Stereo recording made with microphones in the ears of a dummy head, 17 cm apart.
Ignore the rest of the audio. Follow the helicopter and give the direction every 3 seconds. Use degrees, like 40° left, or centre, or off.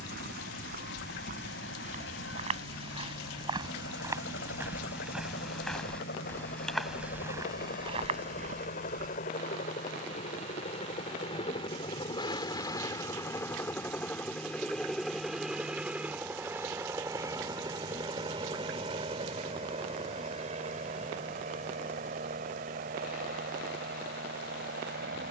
70° left, 60° left, 50° left, 30° left, 10° left, 10° right, 30° right, 40° right, 50° right.